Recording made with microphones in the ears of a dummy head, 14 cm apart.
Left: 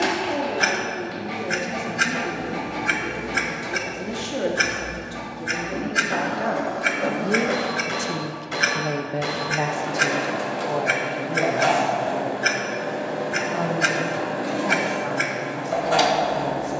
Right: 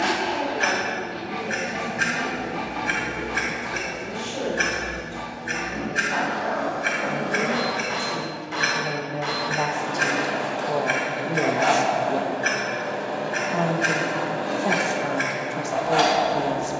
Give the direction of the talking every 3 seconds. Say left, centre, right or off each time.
left, left, left, centre, right, right.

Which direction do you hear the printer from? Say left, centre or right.
left.